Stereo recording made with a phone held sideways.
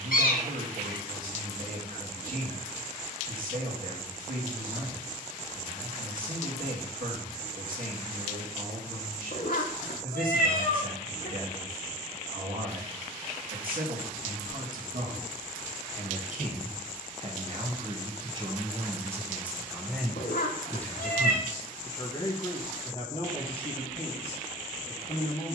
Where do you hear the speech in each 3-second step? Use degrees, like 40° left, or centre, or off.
70° right, 70° right, 70° right, 70° right, 70° right, 50° right, 10° right, 30° left, 40° left.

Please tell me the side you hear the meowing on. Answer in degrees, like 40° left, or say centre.
70° left.